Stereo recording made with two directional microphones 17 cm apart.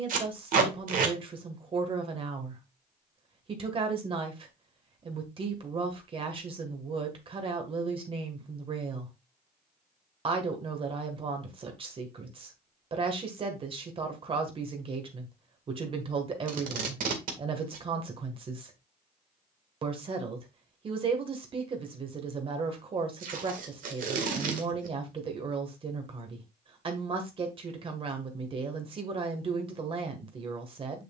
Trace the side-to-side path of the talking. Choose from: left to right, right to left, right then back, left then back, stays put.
stays put.